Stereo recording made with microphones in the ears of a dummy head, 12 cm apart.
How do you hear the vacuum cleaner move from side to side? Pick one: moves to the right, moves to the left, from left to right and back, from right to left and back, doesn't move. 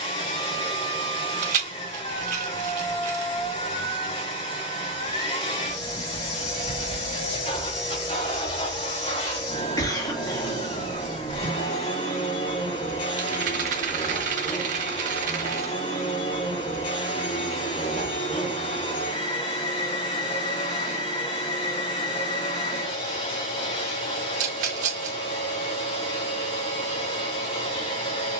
doesn't move.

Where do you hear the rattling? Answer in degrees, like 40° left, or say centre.
60° right.